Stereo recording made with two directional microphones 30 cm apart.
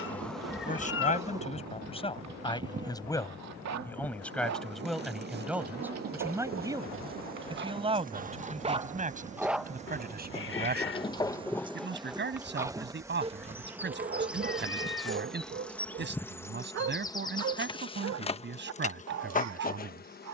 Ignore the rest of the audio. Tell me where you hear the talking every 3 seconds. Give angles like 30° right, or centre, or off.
20° left, centre, 20° right, 30° right, 30° right, 30° right, 30° right.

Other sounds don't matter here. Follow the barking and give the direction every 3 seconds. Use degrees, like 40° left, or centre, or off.
60° right, 50° right, 30° right, 10° left, 20° right, 40° right, 60° right.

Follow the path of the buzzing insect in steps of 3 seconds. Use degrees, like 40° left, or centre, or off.
10° right, 30° right, 30° right, 20° right, 10° right, 10° left, 20° left.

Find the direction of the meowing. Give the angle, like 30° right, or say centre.
40° left.